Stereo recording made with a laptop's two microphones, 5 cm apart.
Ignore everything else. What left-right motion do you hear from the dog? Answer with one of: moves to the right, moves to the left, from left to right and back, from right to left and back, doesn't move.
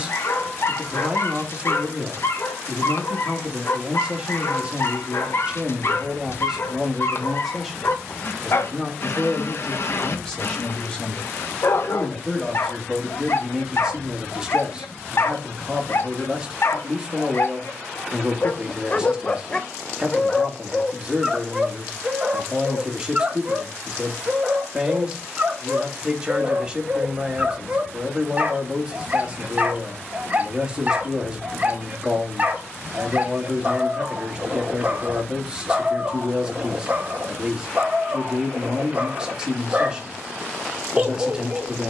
moves to the right.